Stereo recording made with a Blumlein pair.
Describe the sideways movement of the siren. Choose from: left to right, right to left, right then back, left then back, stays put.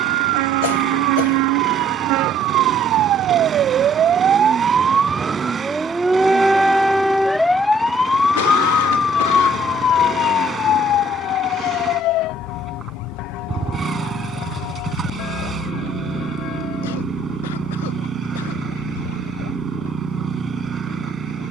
right to left.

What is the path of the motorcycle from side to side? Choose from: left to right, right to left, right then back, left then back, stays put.
stays put.